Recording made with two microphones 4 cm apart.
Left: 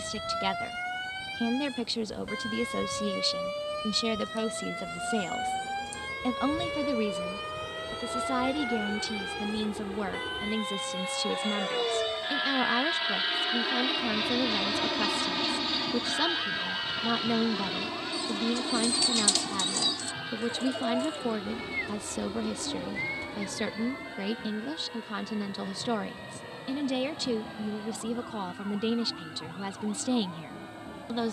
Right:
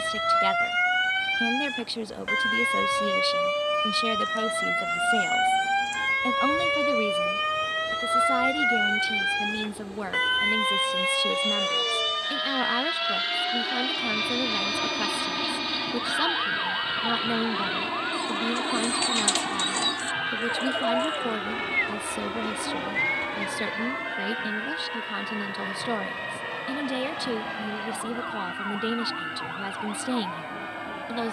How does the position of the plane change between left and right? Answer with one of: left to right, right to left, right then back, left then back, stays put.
left to right.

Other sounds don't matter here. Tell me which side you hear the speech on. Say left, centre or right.
centre.